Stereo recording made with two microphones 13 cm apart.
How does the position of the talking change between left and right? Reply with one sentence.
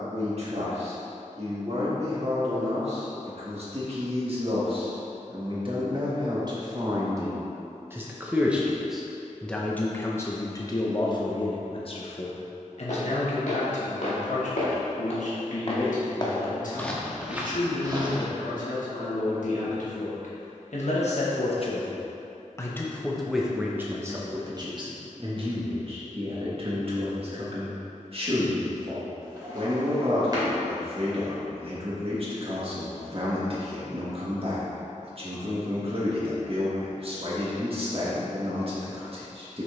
In this clip you hear the talking go left and come back.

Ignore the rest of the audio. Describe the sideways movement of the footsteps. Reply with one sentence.
You can hear the footsteps move to the right.